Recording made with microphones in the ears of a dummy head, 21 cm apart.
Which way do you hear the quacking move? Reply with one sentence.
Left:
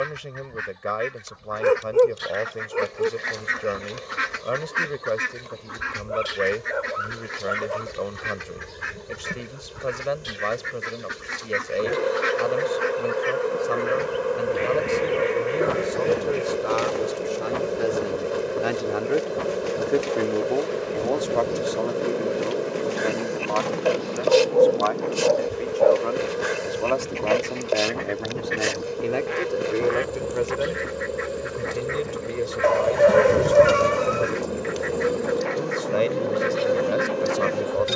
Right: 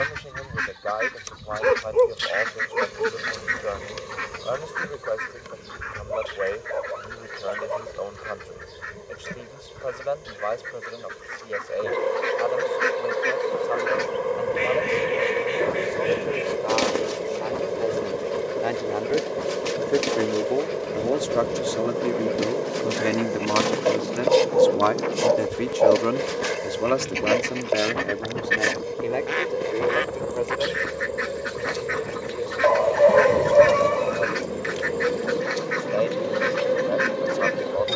In this clip you hear the quacking go left and come back.